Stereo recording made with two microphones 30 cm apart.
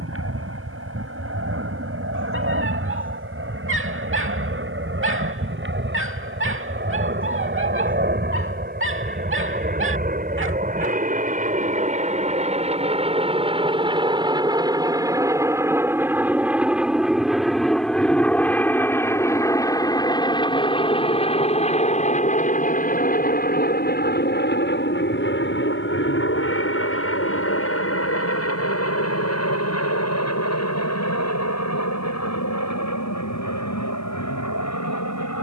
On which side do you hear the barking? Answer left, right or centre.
right.